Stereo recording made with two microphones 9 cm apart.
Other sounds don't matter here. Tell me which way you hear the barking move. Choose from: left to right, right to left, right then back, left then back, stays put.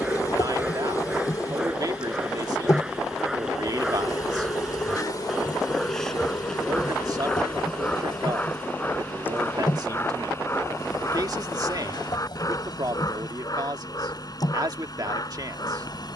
right to left.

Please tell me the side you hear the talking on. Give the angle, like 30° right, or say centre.
50° right.